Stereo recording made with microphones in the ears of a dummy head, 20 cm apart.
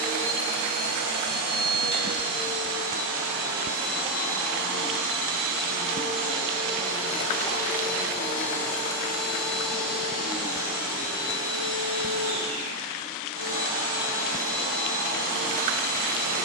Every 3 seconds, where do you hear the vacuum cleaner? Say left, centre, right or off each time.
right, centre, centre, centre, right, right.